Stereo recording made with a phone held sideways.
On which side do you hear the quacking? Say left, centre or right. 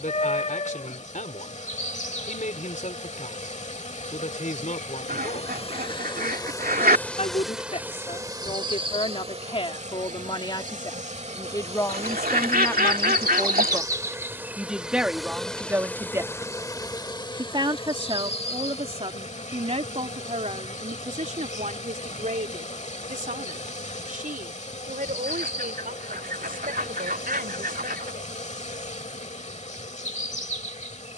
right.